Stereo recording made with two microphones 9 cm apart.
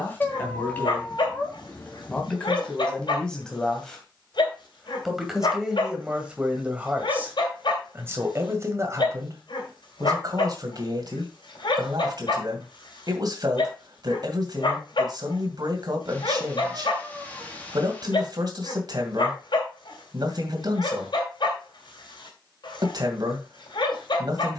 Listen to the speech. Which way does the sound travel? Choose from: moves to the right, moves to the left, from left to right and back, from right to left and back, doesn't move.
moves to the right.